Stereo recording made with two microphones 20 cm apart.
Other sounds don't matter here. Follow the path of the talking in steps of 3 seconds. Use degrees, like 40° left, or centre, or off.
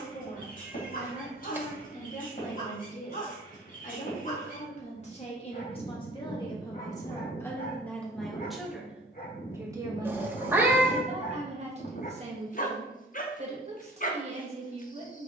40° left, 40° left, 10° left, 30° right, 30° right.